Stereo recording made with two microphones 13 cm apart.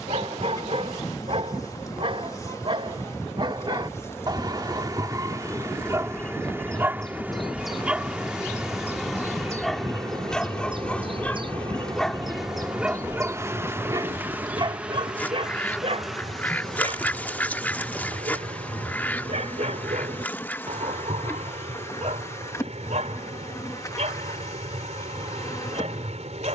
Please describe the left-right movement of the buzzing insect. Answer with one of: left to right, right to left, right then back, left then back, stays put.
right then back.